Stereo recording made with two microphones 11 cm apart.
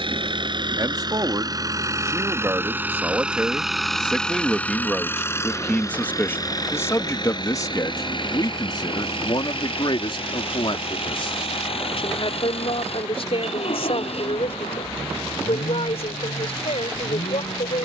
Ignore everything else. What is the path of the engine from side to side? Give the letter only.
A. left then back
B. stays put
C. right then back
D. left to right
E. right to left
E.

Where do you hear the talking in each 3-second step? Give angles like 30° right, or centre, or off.
30° right, centre, 30° left, 50° left, 60° left, 70° left.